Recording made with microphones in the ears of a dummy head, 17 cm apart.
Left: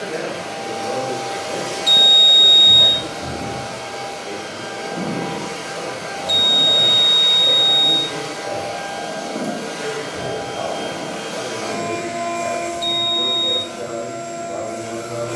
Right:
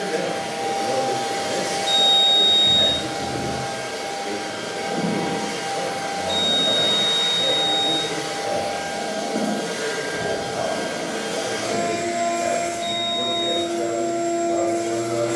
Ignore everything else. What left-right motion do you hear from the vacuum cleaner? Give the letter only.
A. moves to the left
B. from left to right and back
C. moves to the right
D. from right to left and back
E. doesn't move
E.